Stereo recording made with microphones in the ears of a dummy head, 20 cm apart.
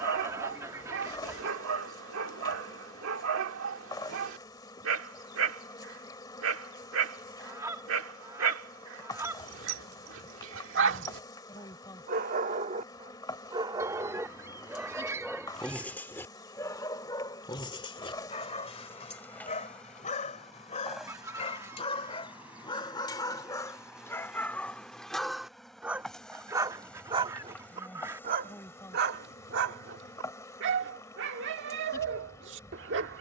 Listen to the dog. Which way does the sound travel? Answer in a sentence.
You can hear the dog move from right to left and back again.